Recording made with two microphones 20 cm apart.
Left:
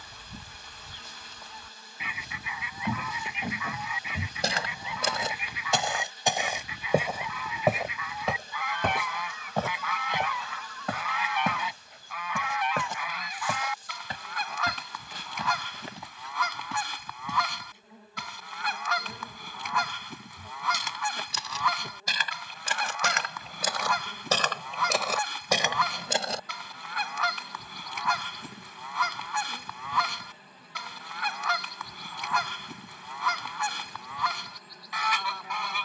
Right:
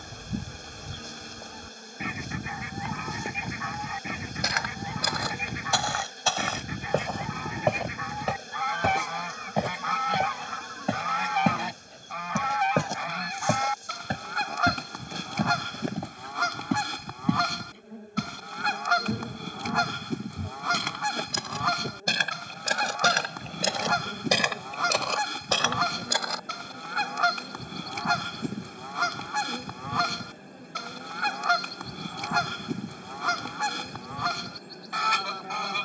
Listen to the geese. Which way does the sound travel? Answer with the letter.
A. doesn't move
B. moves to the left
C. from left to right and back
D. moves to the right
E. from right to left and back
A.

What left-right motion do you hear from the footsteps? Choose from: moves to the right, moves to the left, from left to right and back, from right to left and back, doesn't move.
from left to right and back.